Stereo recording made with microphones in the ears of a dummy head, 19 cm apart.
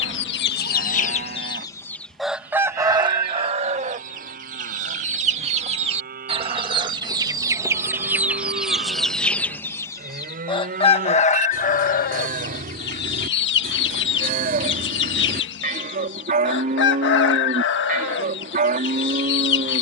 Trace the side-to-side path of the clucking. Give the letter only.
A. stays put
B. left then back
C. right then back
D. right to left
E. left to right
C.